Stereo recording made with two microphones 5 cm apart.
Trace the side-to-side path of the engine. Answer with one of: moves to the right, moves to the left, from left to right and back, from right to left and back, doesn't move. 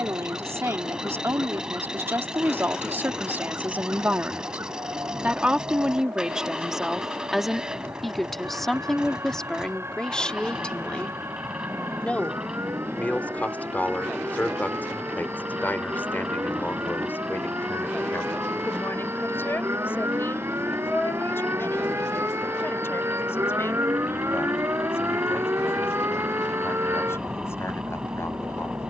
doesn't move.